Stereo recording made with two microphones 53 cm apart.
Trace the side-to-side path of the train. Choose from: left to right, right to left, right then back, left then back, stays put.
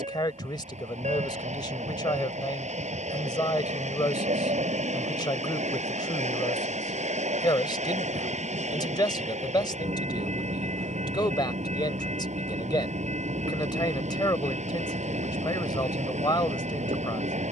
stays put.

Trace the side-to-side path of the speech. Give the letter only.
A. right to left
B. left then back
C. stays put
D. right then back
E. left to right
C.